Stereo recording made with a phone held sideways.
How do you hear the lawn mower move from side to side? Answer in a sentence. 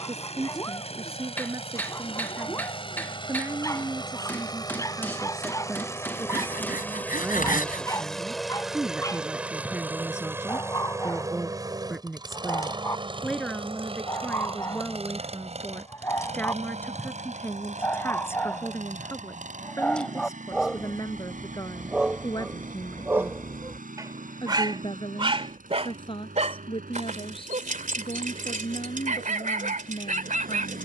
You can hear the lawn mower travel towards the right.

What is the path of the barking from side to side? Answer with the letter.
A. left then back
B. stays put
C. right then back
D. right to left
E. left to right
E.